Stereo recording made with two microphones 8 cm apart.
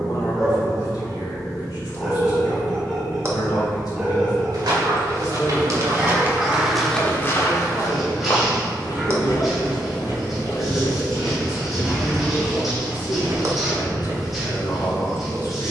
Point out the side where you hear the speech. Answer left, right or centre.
left.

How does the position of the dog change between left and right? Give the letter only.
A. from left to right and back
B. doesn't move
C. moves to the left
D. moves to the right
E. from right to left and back
B.